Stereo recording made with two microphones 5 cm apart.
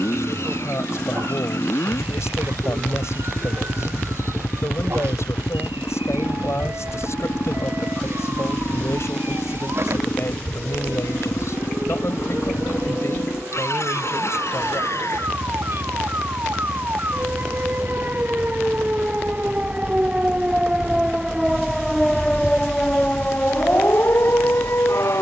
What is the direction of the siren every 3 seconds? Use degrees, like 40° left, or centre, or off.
60° right, 60° right, 60° right, 50° right, 50° right, 40° right, 30° right, 10° left, 50° left.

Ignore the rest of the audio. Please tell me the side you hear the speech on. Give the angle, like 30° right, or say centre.
60° left.